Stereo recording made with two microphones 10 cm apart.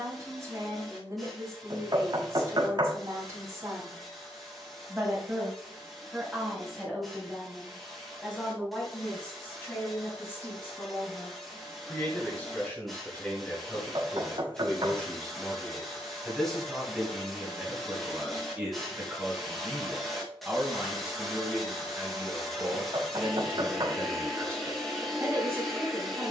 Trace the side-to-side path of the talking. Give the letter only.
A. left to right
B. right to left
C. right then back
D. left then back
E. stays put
D.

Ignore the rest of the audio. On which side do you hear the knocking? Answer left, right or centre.
right.